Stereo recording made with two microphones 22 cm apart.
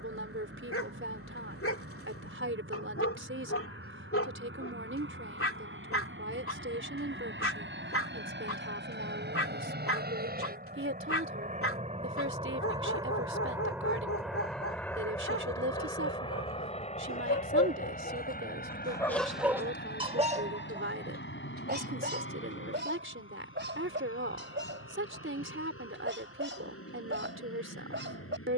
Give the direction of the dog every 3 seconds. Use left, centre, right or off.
left, left, left, left, left, left, centre, right, right, right.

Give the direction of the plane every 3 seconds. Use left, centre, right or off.
right, right, right, right, centre, left, left, left, left, left.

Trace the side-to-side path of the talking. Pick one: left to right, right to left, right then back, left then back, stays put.
stays put.